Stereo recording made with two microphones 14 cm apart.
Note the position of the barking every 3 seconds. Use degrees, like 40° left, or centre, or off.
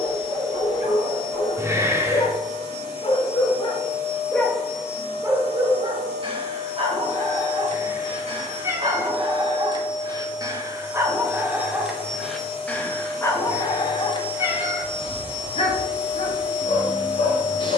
70° left, centre, 50° right, 20° right, 20° left, 60° left.